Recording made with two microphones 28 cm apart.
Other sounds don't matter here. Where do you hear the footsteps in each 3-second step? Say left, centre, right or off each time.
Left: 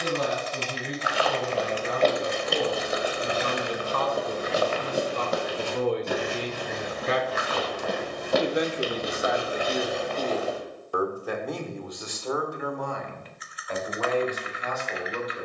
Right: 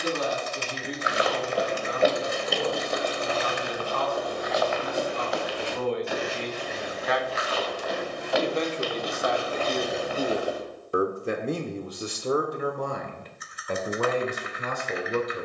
centre, left, left, centre, off.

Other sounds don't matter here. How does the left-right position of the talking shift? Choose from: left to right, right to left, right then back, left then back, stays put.
left to right.